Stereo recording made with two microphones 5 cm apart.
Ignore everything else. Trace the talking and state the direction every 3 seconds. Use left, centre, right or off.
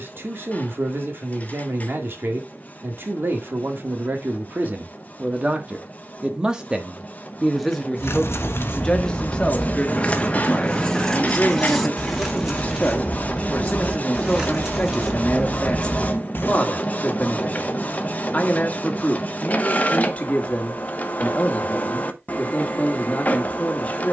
right, right, centre, left, left, left, left, left.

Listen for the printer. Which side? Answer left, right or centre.
left.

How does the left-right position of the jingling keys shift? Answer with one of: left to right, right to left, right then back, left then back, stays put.
right then back.